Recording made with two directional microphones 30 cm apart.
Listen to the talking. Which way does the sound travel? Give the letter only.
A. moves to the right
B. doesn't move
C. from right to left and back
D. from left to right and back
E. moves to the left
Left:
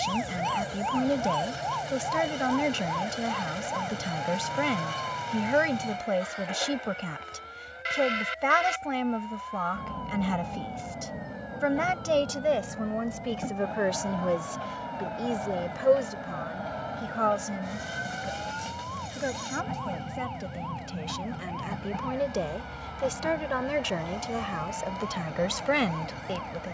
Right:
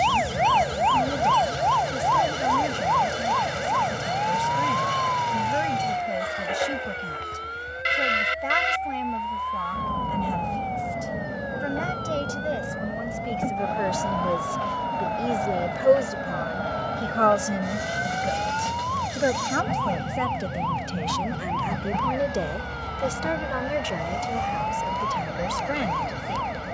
D.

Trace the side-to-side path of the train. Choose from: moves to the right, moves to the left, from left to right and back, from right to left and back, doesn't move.
doesn't move.